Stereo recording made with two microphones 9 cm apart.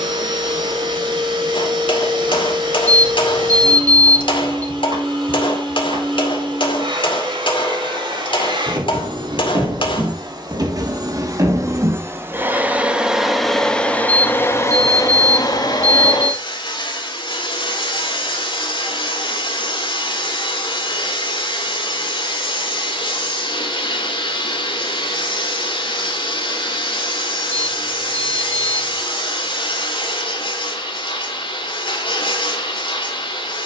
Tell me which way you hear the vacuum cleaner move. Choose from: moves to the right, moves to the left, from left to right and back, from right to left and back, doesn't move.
moves to the left.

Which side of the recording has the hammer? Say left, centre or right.
left.